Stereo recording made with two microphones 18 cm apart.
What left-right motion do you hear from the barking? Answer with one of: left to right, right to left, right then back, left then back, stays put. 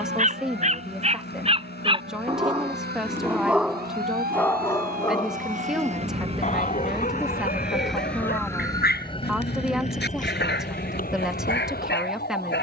right to left.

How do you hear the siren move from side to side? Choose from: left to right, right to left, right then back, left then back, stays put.
right to left.